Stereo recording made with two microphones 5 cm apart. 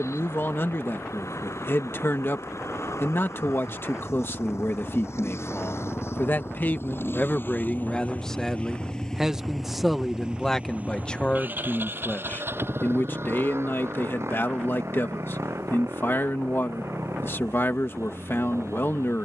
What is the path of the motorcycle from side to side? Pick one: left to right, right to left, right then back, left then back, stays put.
left to right.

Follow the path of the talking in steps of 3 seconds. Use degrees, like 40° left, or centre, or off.
50° left, 50° left, 20° left, 10° left, 50° left, 50° left, 50° left.